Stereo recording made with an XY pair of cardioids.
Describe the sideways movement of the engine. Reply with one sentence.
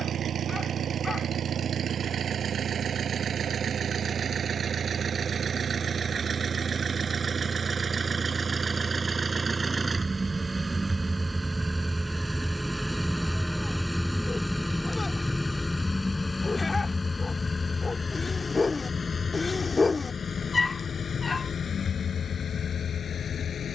In this clip you hear the engine move from right to left.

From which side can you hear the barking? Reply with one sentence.
You can hear the barking on the left.